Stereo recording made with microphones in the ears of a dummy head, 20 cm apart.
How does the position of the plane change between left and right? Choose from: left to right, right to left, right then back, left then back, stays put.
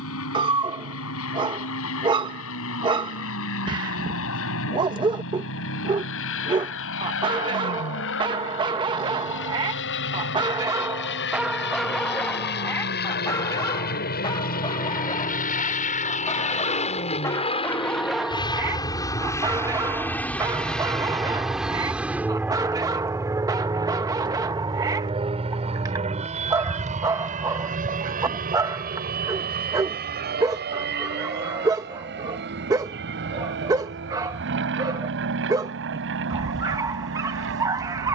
left to right.